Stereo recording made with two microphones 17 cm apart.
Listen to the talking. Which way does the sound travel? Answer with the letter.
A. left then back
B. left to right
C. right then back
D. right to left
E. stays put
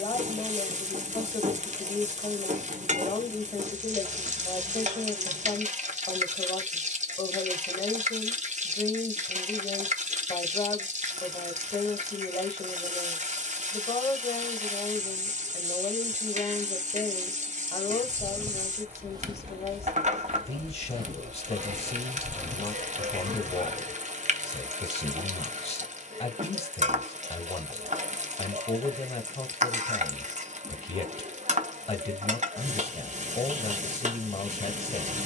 E.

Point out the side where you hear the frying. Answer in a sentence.
In this clip you hear the frying on the right.